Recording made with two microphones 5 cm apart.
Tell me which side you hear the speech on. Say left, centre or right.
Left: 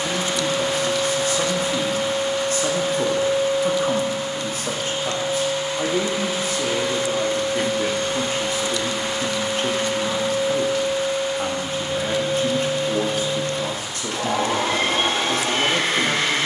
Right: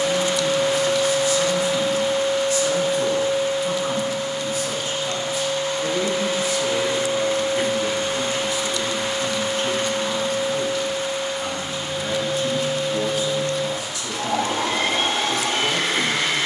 left.